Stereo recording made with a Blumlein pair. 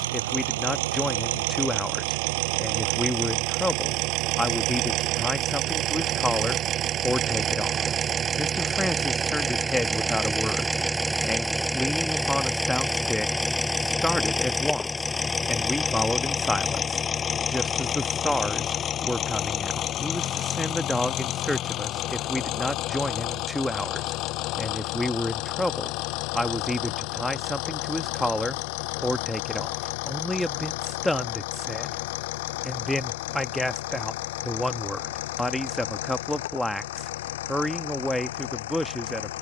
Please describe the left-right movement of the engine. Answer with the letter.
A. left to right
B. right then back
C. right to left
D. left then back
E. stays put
C.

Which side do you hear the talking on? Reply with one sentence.
You can hear the talking in the centre.